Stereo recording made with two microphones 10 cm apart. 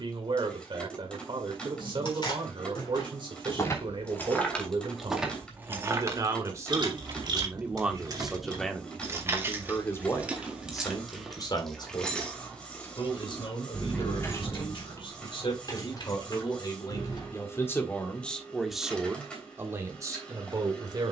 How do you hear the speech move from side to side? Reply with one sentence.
You can hear the speech move from right to left and back again.